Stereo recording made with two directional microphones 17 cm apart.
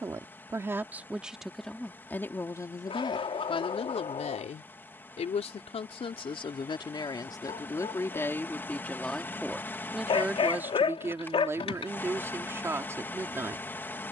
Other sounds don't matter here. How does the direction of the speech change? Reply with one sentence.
You can hear the speech move from right to left and back again.